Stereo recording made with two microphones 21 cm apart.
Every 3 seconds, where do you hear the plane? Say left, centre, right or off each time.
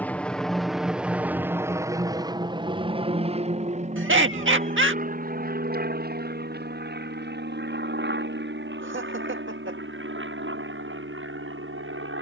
centre, right, right, right.